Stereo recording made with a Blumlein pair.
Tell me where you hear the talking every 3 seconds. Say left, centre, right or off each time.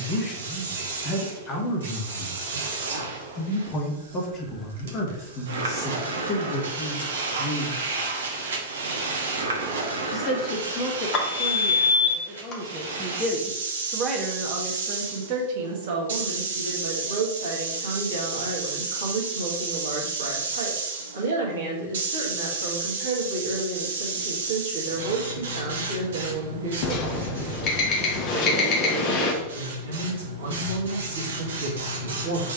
left, left, left, left, centre, right, right, right, right, right, right.